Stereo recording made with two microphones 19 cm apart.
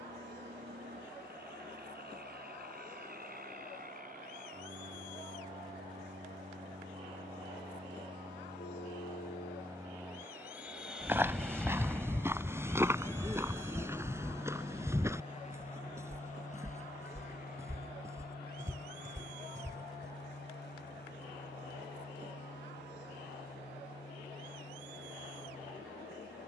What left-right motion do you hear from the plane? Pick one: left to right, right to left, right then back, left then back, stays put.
right to left.